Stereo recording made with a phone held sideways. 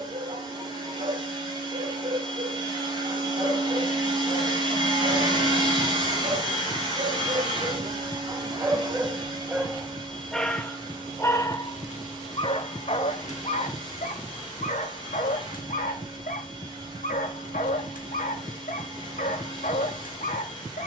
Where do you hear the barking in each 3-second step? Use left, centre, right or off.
right, right, right, centre, left, left, left.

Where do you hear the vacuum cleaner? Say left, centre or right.
right.